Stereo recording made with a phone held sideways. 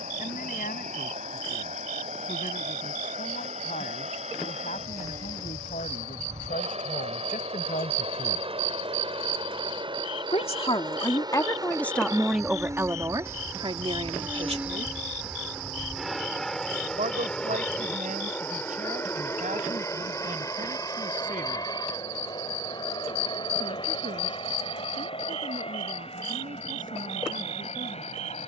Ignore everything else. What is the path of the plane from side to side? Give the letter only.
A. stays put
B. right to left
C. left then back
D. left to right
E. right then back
B.